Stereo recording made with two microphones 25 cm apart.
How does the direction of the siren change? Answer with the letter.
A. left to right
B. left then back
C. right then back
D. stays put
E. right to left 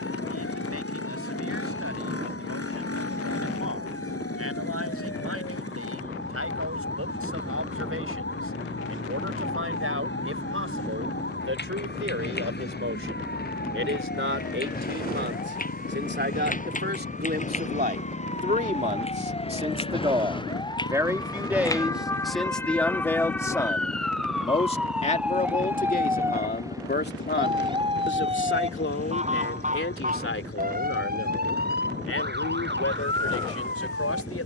A.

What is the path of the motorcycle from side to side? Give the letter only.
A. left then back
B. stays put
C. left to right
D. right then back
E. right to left
B.